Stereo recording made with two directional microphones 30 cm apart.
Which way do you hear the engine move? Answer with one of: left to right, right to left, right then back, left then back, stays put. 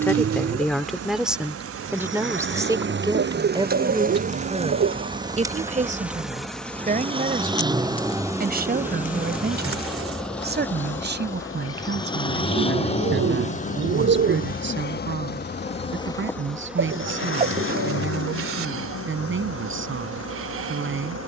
right to left.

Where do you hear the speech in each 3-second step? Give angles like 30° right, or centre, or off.
centre, 20° right, 30° right, 30° right, 40° right, 40° right, 40° right.